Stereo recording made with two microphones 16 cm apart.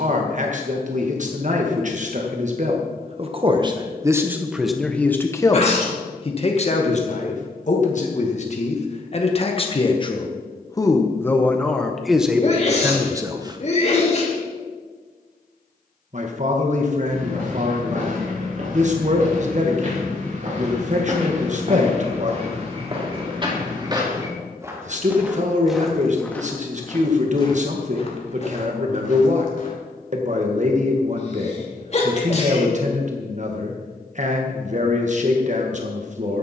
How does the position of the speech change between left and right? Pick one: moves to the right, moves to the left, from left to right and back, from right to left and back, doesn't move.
from right to left and back.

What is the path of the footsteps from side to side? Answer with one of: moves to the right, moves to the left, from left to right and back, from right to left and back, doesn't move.
moves to the left.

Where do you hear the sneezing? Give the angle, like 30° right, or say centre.
40° left.